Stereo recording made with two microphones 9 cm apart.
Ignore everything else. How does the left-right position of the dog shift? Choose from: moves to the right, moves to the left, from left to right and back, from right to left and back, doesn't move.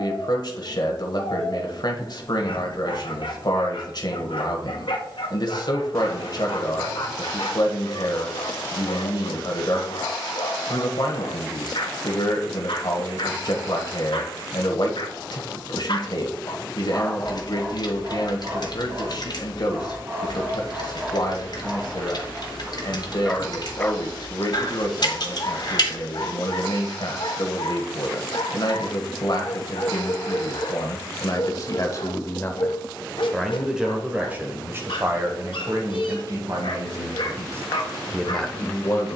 from left to right and back.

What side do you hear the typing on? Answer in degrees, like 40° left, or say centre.
60° left.